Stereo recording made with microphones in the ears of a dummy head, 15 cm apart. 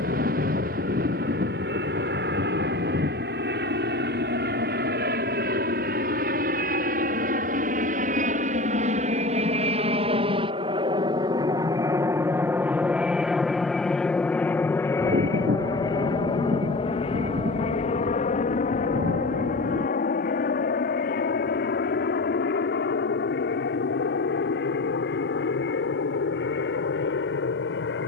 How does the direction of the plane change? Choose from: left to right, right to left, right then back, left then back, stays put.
right to left.